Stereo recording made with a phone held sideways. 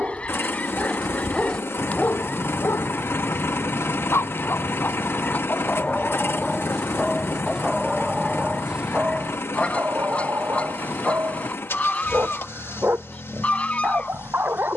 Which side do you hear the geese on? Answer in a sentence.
You can hear the geese in the centre.